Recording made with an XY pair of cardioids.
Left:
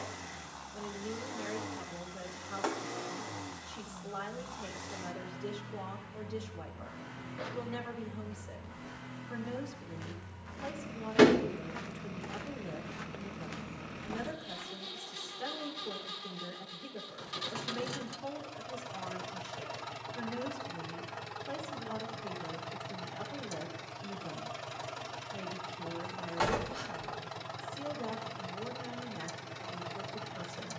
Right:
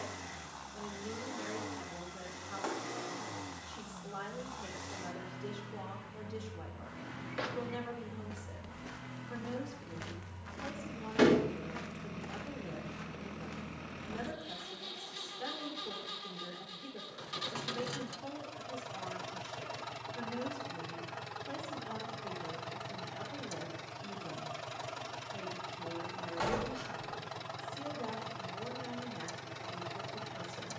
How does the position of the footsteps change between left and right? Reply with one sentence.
In this clip you hear the footsteps move to the left.